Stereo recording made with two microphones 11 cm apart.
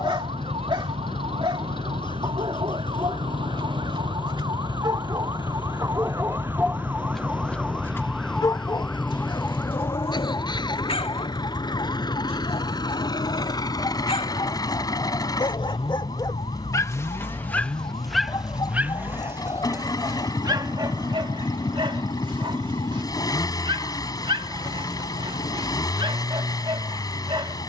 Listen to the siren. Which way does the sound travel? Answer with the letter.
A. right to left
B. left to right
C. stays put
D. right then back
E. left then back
A.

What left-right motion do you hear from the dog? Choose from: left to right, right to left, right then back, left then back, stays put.
left then back.